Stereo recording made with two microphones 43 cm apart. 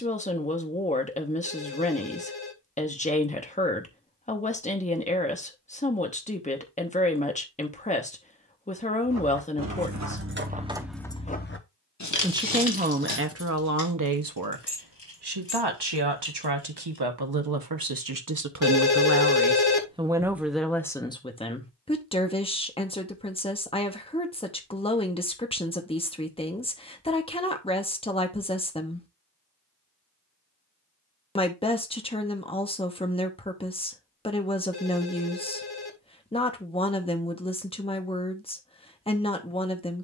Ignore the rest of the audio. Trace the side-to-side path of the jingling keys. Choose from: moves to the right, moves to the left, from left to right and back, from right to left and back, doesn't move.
moves to the left.